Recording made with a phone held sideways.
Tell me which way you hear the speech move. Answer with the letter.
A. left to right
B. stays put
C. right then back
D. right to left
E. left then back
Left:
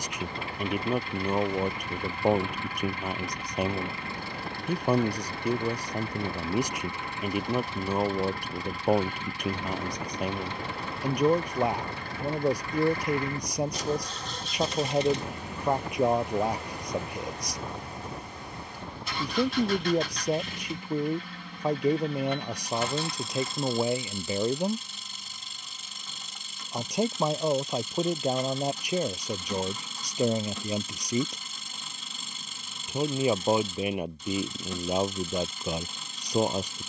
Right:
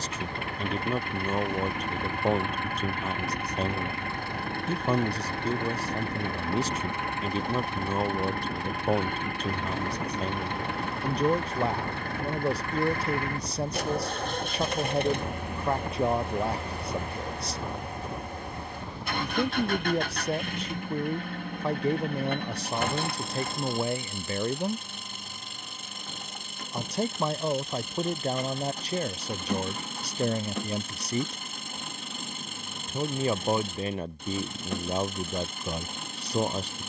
B.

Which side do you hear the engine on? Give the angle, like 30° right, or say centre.
60° right.